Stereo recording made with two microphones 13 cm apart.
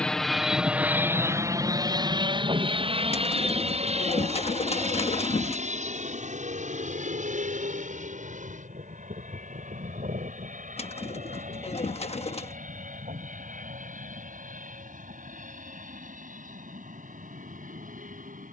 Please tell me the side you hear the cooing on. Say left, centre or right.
left.